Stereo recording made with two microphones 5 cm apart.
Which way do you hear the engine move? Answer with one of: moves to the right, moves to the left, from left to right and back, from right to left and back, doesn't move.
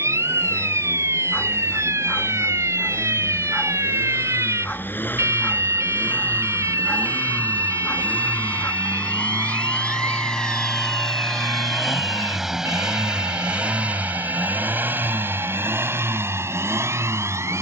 moves to the right.